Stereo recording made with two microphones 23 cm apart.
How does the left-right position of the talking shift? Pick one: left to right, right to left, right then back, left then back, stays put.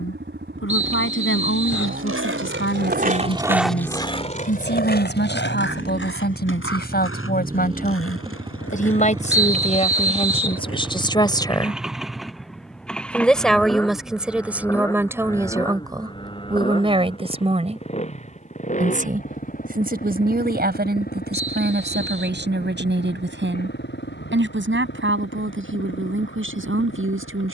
left to right.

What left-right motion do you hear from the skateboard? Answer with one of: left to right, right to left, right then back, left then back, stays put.
right to left.